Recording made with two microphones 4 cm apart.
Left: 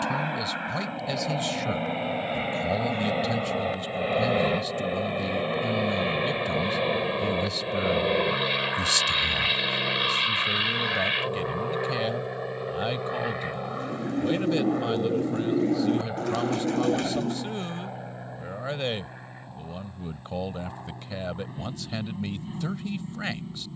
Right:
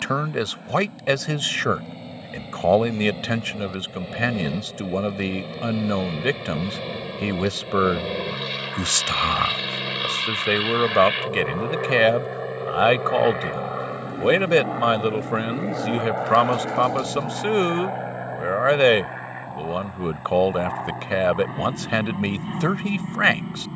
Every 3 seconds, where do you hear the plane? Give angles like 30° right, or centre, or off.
50° left, 40° left, 20° left, centre, 10° right, 30° right, 40° right, 40° right.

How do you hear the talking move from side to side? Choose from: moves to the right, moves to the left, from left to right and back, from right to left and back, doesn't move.
doesn't move.